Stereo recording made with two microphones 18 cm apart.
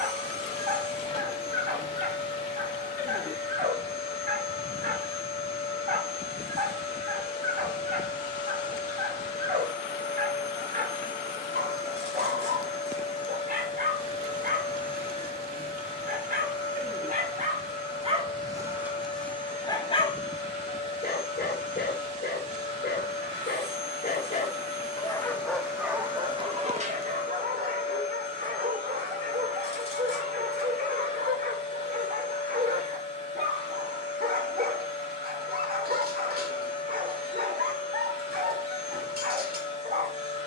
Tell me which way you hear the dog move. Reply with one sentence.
You can hear the dog go left and come back.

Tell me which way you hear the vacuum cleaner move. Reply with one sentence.
You can hear the vacuum cleaner stay put.